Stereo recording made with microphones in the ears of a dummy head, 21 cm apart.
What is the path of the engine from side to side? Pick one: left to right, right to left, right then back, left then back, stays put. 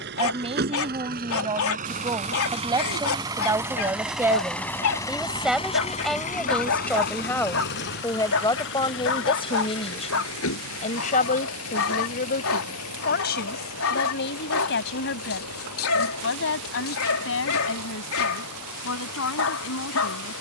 right to left.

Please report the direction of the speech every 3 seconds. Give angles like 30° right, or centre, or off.
20° right, 10° right, 10° left, 30° left, 50° left, 60° left, 70° left.